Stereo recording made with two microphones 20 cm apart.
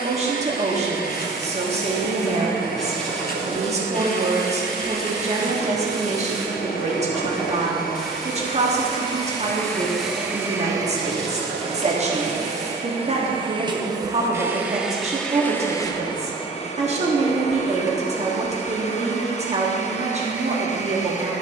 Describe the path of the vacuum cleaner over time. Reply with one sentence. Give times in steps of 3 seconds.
In this clip you hear the vacuum cleaner on the left from 0 s, in the centre from 9 s, on the right from 12 s and on the left from 15 s.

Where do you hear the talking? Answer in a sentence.
In this clip you hear the talking on the right.